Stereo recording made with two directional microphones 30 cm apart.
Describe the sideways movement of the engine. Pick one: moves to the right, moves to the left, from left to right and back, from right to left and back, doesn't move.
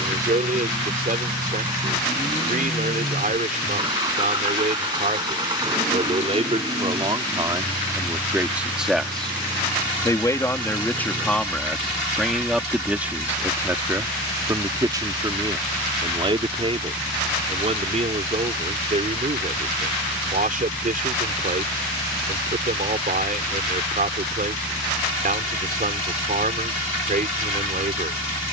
doesn't move.